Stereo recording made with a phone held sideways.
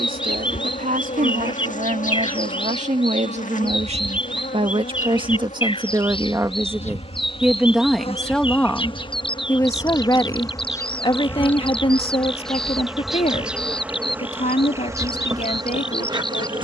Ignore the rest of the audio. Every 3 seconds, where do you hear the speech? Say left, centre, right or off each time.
right, right, centre, left, left, left.